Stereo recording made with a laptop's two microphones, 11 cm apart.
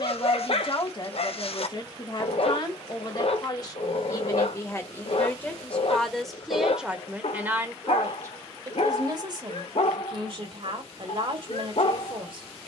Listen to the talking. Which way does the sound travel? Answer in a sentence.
In this clip you hear the talking go from the left side to the right.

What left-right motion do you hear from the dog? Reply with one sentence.
In this clip you hear the dog stay put.